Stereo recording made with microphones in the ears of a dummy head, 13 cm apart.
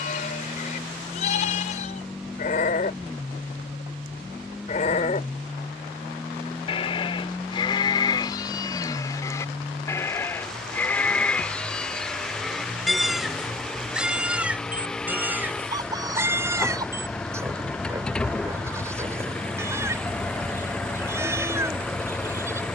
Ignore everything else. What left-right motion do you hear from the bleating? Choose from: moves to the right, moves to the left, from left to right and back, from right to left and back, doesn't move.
moves to the right.